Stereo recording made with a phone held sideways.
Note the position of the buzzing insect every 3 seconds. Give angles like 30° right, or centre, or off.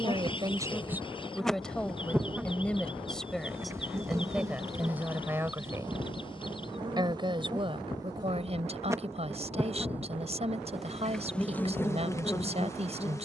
10° left, 20° right, 30° right, centre, 20° left.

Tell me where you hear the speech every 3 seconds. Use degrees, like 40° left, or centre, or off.
centre, 10° right, 30° right, 40° right, 40° right.